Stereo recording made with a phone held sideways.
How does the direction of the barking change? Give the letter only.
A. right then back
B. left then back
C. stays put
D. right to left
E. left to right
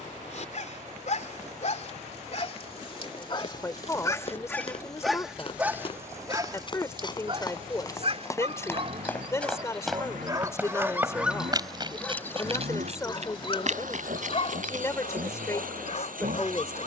A.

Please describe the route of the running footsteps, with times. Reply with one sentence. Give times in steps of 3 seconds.
In this clip you hear the running footsteps not at all from 0 s, on the left from 3 s, in the centre from 9 s, on the right from 12 s and not at all from 15 s.